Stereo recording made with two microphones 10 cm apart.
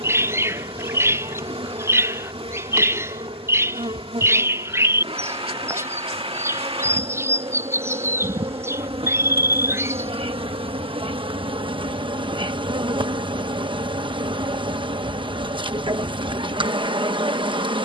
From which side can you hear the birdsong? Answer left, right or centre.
right.